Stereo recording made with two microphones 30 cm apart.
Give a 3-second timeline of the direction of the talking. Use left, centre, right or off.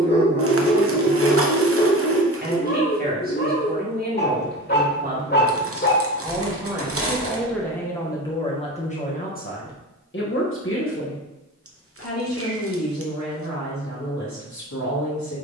right, right, centre, left, left.